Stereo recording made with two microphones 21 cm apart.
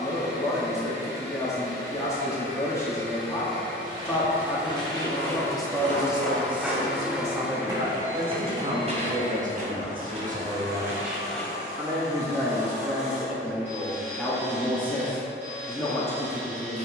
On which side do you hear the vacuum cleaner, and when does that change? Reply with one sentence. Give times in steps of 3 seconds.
In this clip you hear the vacuum cleaner on the right from 0 s, in the centre from 3 s and on the right from 9 s.